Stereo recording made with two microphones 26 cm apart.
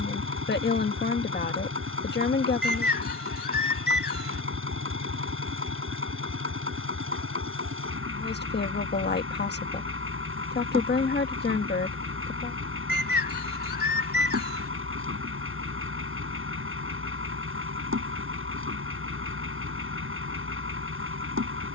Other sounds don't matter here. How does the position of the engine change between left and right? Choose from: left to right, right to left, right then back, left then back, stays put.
stays put.